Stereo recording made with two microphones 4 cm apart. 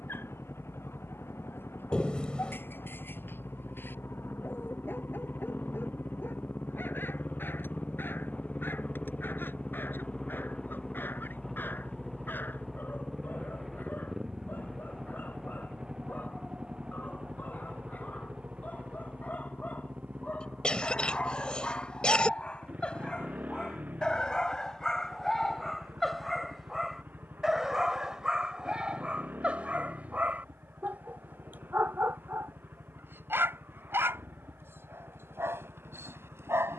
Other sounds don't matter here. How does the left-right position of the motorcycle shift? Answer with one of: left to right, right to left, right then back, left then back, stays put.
left to right.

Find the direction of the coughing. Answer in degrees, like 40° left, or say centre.
20° left.